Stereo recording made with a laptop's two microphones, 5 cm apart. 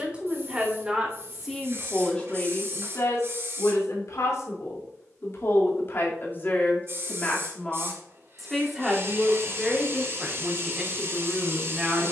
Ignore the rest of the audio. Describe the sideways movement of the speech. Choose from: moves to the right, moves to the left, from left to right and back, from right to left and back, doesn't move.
from right to left and back.